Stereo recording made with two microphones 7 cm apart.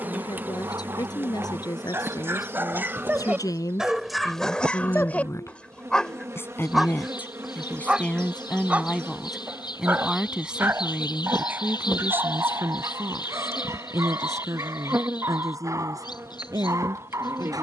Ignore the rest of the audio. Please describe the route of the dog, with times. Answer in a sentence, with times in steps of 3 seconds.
In this clip you hear the dog on the right from 0 s, in the centre from 3 s and on the right from 9 s.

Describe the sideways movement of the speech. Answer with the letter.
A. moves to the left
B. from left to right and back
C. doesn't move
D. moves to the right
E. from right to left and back
D.